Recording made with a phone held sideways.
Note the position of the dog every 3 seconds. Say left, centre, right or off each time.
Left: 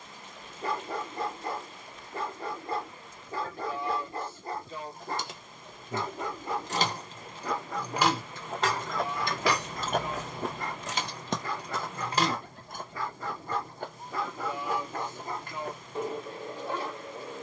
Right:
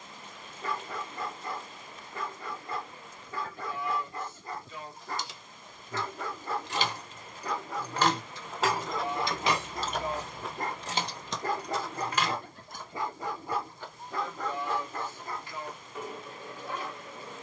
left, left, centre, right, centre, left.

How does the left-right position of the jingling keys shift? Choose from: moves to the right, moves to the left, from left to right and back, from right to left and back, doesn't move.
from left to right and back.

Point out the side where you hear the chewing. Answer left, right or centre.
left.